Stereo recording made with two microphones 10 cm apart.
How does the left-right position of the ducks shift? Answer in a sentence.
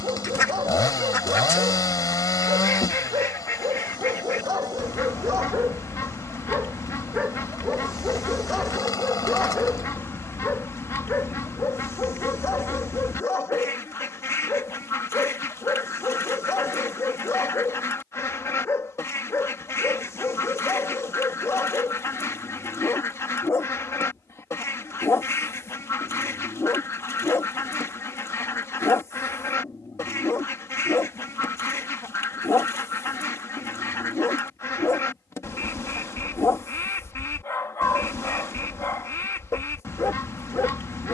In this clip you hear the ducks stay in one place.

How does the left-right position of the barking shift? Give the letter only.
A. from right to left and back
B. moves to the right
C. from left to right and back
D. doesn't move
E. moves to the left
E.